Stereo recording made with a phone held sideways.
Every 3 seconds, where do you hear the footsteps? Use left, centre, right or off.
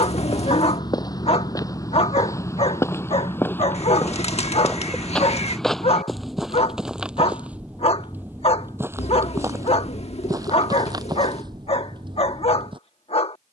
left, centre, centre, right, right.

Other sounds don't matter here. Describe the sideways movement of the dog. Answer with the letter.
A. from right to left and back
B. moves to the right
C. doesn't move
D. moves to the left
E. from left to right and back
C.